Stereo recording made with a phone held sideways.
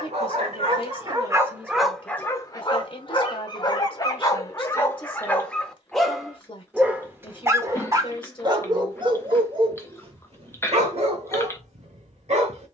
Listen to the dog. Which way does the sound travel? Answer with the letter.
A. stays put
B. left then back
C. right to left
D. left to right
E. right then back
B.